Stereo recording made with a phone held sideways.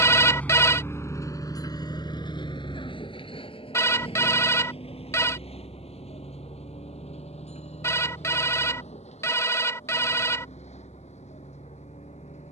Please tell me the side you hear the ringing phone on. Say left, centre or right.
left.